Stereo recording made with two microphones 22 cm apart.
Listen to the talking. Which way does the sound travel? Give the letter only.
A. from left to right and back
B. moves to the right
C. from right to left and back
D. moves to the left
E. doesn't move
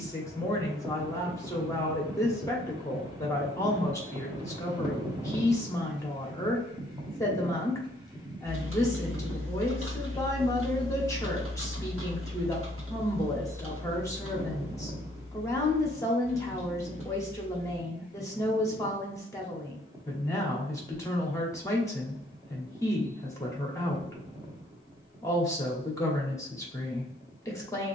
E.